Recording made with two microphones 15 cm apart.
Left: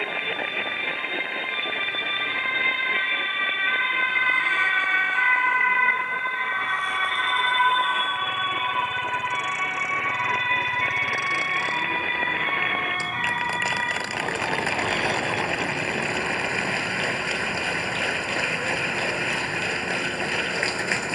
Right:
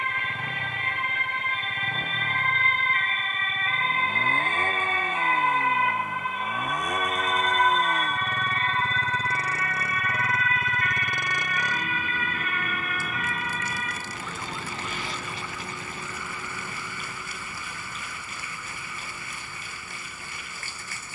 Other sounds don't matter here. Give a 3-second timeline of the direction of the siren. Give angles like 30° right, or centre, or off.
50° right, 30° right, centre, 20° left, 40° left, 50° left, 50° left.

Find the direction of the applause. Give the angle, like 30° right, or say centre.
90° left.